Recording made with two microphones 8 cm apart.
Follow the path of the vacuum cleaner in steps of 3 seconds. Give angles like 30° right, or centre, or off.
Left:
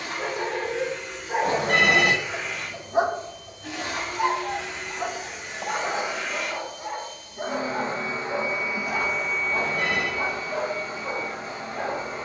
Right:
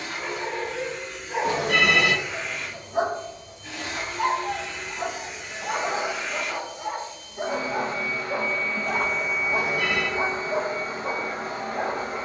70° left, 70° left, 40° left, 30° right.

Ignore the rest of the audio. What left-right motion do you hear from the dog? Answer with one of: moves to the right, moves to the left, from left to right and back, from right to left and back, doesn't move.
moves to the right.